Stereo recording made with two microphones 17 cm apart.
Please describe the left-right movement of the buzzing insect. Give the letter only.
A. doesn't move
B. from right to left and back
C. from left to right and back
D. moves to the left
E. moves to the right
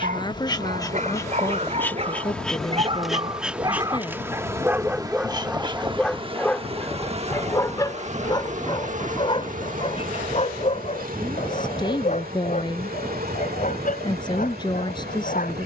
E.